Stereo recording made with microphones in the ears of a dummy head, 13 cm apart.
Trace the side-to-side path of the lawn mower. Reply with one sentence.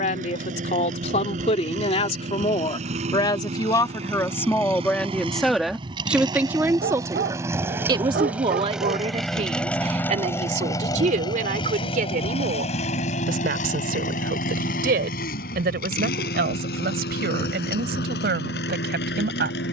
In this clip you hear the lawn mower go from the right side to the left.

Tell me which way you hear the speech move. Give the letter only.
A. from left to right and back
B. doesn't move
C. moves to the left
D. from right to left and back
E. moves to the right
E.